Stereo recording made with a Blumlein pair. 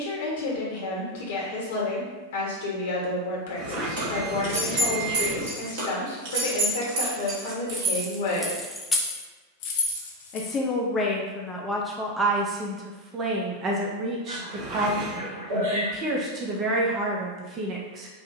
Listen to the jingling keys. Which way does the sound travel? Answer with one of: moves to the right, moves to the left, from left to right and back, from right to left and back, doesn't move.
moves to the left.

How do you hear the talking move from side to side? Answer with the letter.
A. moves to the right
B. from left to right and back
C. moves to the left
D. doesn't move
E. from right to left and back
A.